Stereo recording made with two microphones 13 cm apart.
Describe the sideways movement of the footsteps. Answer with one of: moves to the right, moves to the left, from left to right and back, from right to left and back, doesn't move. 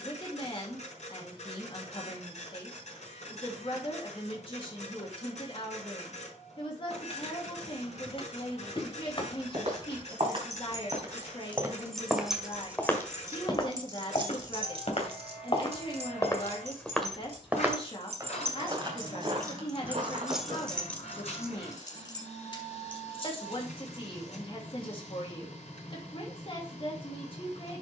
from right to left and back.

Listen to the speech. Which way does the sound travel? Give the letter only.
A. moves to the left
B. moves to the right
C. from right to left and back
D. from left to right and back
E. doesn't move
E.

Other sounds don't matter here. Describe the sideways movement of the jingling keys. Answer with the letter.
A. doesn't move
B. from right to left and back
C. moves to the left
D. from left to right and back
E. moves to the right
D.